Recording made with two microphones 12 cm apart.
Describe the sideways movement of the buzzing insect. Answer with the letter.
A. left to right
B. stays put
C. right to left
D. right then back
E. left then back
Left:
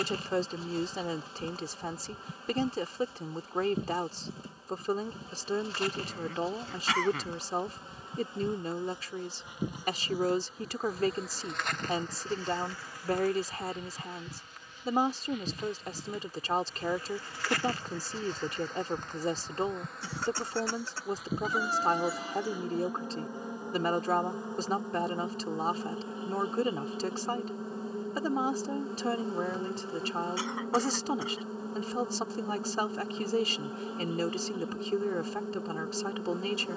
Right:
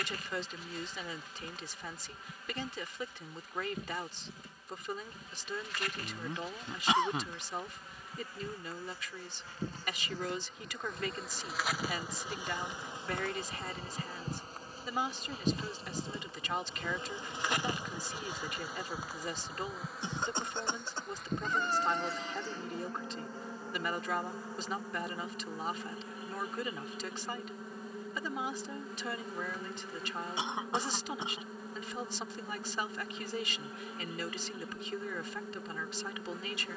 D.